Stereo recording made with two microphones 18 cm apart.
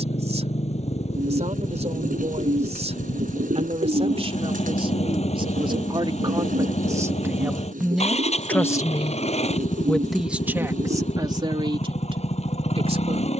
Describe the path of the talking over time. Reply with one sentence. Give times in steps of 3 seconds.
In this clip you hear the talking on the right from 0 s, in the centre from 6 s and on the right from 12 s.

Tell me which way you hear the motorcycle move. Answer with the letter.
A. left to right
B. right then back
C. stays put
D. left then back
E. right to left
C.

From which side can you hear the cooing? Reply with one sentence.
In this clip you hear the cooing on the right.